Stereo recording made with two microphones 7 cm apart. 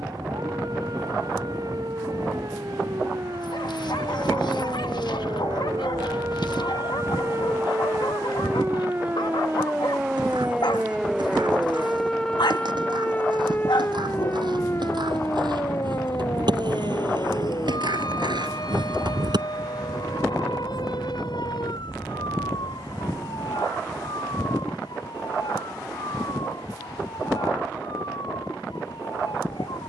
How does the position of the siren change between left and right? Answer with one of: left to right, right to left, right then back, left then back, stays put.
right to left.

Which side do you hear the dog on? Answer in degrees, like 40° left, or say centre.
70° left.